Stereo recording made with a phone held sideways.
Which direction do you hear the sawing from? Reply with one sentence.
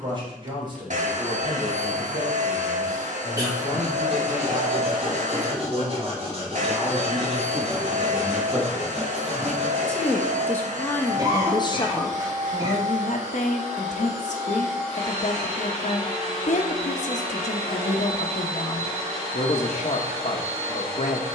In this clip you hear the sawing on the right.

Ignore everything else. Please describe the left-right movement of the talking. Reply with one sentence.
In this clip you hear the talking travel towards the left.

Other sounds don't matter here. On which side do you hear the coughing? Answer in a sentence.
In this clip you hear the coughing on the right.